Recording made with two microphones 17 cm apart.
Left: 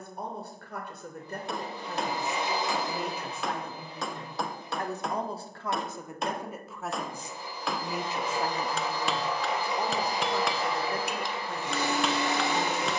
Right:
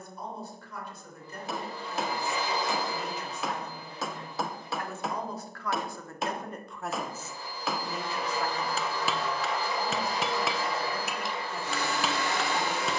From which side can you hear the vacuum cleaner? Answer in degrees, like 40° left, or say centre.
20° left.